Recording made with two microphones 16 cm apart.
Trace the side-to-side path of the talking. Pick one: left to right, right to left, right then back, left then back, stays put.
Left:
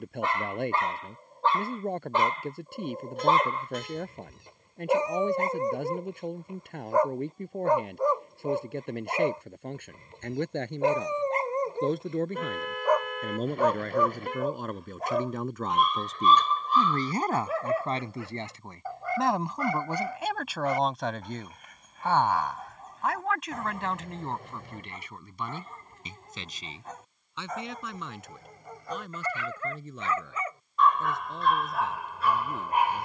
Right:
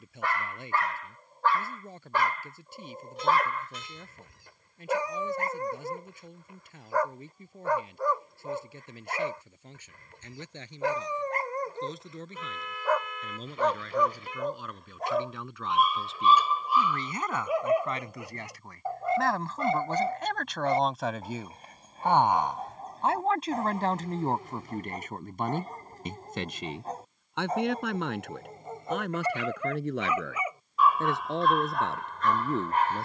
left to right.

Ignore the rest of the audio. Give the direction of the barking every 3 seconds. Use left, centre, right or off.
left, left, left, left, centre, centre, right, right, right, right, centre.